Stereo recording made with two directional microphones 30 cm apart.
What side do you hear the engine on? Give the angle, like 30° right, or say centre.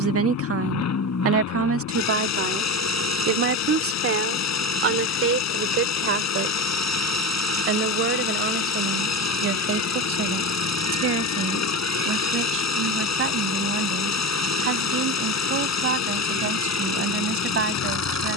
60° left.